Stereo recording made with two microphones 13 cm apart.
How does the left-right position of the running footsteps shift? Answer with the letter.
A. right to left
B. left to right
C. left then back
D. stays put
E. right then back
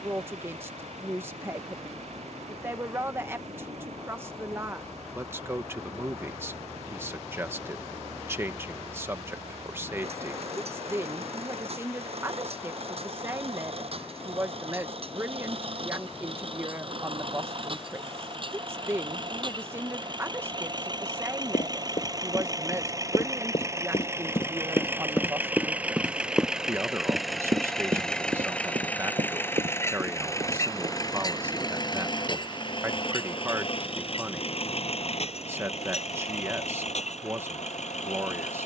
B.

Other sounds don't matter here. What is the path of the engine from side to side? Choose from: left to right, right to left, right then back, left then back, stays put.
right to left.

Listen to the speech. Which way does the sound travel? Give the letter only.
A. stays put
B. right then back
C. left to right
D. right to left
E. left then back
A.